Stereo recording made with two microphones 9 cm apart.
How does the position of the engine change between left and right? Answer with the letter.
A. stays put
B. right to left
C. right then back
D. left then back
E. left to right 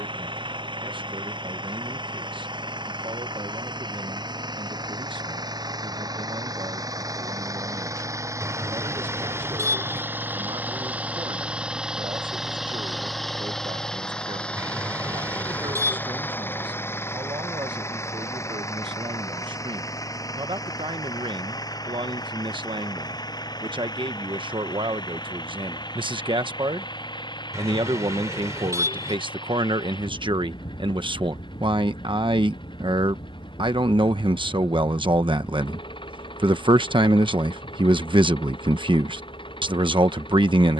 B.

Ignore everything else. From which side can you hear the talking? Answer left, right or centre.
right.